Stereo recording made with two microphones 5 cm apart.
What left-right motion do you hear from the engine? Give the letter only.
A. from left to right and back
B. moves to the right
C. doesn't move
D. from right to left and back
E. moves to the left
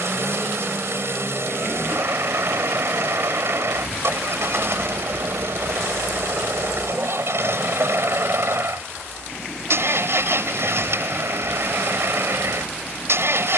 C.